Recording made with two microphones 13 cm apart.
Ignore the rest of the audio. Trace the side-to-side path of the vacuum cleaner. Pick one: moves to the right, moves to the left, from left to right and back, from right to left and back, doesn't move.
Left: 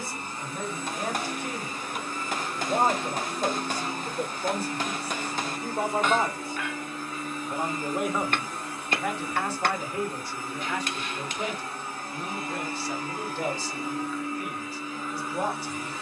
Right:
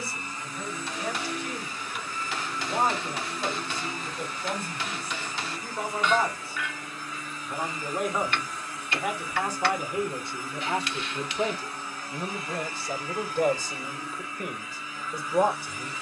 doesn't move.